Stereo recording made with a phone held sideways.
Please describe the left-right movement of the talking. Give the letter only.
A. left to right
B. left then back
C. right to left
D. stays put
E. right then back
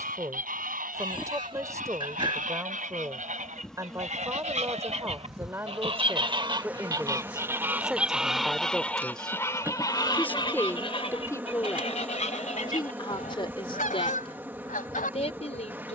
C.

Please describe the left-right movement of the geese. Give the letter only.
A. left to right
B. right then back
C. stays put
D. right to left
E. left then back
D.